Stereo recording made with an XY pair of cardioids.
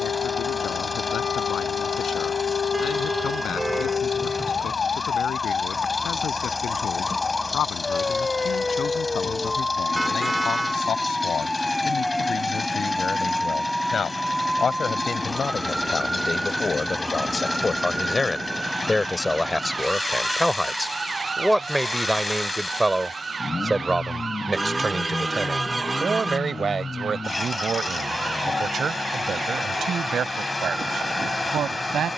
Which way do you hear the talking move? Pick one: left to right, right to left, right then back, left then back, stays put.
left to right.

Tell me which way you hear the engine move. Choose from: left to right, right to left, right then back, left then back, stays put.
stays put.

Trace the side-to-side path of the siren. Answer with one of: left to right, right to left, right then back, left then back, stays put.
left to right.